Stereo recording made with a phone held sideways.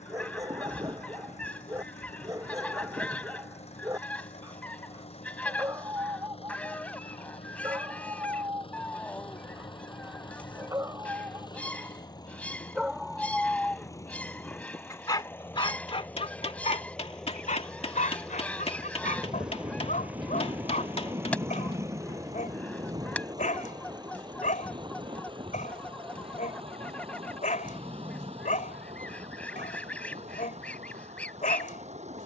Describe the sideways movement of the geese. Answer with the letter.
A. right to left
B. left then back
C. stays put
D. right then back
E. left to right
C.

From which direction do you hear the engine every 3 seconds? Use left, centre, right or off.
left, left, left, left, left, centre, centre, right, right, right, right.